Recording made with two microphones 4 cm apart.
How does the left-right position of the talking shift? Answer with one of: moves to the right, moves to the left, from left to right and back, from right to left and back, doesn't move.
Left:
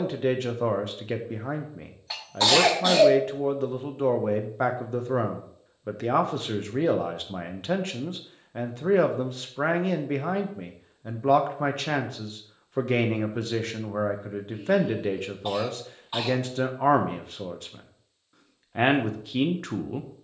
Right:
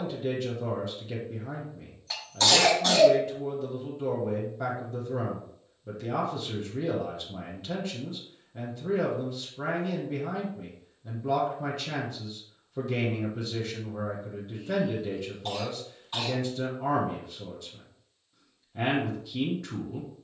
doesn't move.